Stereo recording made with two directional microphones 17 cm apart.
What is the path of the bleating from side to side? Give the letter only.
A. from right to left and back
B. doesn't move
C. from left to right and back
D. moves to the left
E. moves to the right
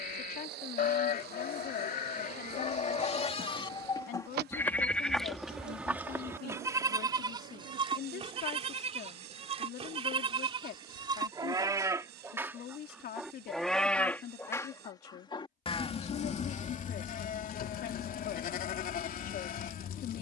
C.